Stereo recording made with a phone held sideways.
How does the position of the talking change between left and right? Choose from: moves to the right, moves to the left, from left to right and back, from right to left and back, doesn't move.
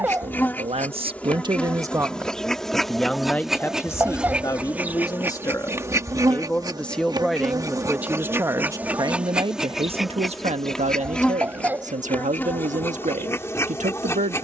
from right to left and back.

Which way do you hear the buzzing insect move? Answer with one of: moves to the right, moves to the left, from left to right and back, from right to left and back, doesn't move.
from left to right and back.